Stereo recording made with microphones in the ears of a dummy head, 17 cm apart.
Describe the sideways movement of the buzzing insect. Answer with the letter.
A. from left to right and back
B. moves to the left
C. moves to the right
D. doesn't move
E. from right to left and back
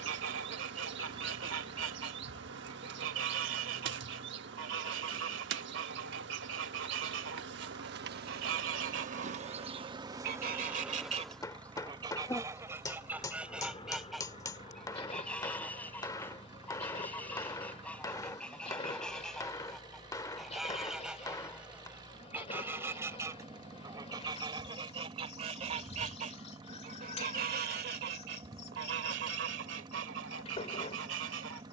B.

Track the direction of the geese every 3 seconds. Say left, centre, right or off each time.
right, right, right, right, centre, centre, centre, centre, right, right, right.